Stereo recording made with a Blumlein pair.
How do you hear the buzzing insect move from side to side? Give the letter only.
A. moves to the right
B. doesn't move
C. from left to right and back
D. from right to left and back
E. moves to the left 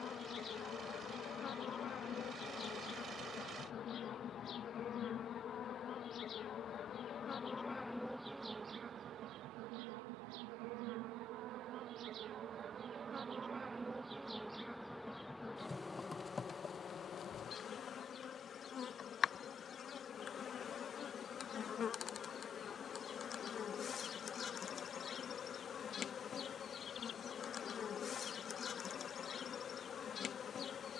C.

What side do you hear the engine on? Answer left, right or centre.
right.